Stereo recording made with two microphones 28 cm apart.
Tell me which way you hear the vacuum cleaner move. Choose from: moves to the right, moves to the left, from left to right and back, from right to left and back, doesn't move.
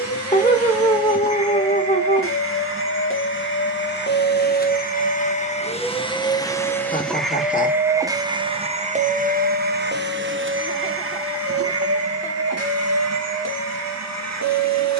moves to the right.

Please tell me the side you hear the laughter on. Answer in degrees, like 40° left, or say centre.
30° left.